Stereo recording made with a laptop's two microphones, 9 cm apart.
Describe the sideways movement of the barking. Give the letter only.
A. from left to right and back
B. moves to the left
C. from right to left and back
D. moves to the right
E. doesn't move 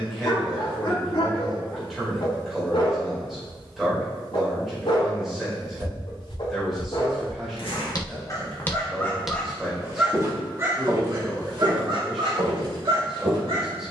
D.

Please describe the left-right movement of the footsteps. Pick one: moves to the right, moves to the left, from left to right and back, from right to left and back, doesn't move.
moves to the right.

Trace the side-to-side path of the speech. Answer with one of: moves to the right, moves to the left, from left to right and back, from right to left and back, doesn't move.
doesn't move.